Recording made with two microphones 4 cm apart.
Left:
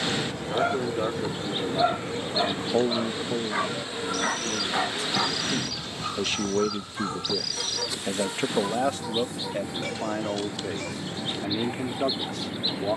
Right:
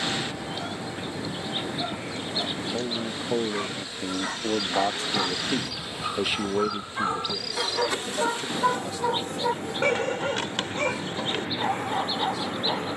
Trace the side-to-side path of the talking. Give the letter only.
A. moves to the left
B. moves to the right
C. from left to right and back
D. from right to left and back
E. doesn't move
C.